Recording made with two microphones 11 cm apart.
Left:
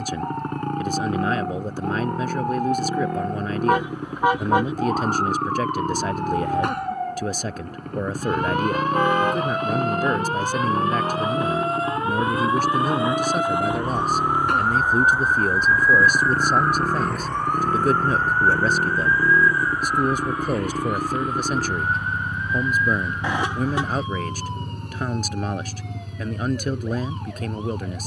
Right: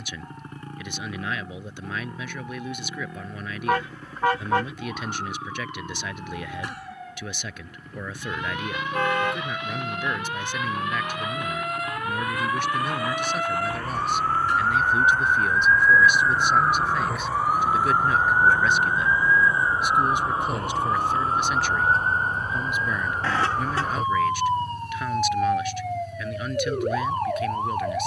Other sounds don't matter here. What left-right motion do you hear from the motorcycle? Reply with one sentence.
You can hear the motorcycle stay in one place.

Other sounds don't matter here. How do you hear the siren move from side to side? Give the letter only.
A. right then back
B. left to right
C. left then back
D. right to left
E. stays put
B.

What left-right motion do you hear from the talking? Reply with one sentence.
You can hear the talking stay in one place.